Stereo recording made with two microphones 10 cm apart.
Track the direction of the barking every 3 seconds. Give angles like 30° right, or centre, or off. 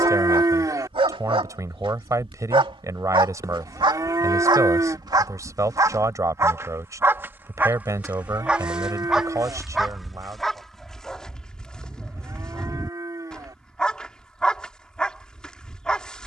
70° right, 50° right, 20° right, centre, 10° left, 10° left.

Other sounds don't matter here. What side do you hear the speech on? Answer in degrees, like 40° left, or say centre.
30° right.